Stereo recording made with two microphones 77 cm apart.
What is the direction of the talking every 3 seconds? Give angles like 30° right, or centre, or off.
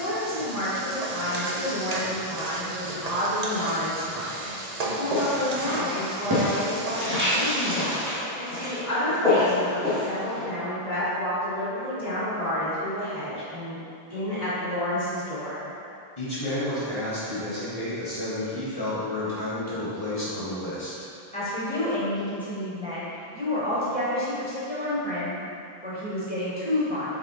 60° left, 60° left, 60° left, 60° left, 60° left, 50° left, 30° left, centre, 10° right.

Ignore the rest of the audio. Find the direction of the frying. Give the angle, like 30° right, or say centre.
60° right.